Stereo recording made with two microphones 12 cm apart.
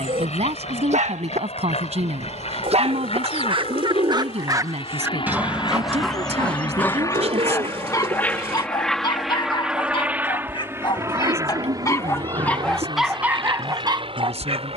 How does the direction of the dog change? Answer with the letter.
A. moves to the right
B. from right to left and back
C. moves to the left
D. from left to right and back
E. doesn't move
B.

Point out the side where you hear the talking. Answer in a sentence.
In this clip you hear the talking on the right.